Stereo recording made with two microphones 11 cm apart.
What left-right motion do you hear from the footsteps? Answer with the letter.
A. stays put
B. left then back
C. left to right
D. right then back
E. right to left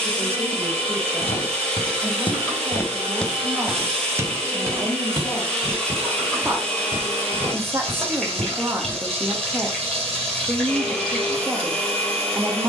C.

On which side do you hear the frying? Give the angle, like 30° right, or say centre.
centre.